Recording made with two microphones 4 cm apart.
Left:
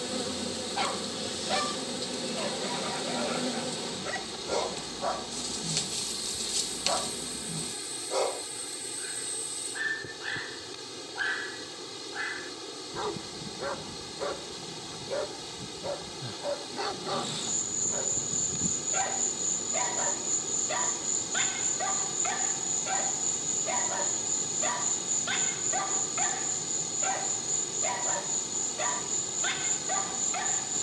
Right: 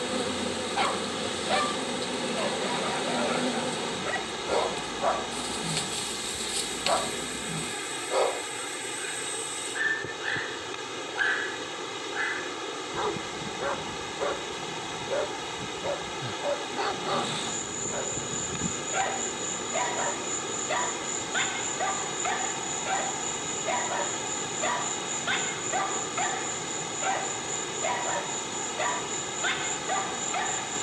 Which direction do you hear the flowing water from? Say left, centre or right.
right.